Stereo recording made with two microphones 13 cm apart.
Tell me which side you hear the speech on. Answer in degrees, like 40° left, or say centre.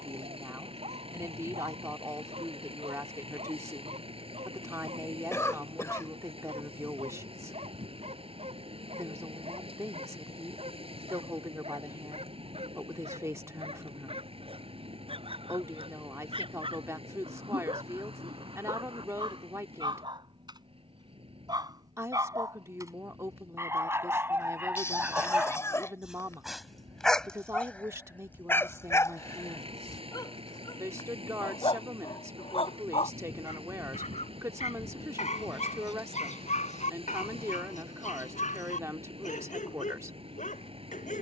20° right.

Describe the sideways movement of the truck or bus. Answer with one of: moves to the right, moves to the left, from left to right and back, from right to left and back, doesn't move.
doesn't move.